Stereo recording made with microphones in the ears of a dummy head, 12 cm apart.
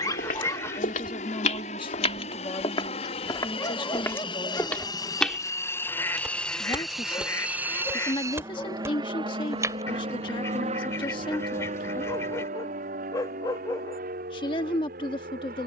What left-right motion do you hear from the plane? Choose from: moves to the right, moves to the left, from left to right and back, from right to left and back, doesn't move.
moves to the right.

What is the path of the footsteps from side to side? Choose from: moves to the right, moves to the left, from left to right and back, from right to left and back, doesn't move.
moves to the right.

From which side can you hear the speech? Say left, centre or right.
left.